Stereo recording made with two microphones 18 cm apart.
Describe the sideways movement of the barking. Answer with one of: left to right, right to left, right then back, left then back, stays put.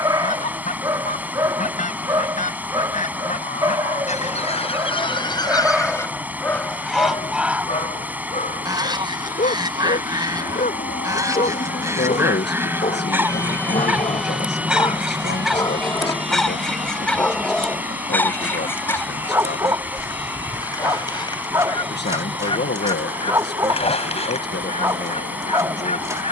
left then back.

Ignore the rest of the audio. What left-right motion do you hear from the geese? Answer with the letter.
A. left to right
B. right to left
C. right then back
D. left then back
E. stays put
C.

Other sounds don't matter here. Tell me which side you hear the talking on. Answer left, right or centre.
left.